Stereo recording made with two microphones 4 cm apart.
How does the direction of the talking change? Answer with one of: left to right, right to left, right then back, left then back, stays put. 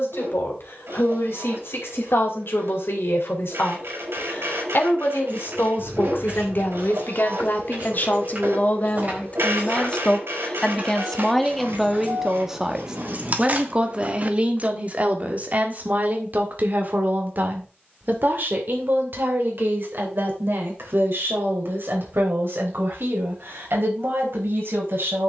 left to right.